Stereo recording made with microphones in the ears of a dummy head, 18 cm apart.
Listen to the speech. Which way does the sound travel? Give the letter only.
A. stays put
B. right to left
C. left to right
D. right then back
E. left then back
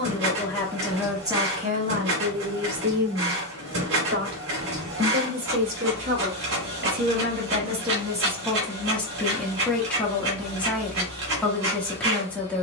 D.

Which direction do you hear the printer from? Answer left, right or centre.
right.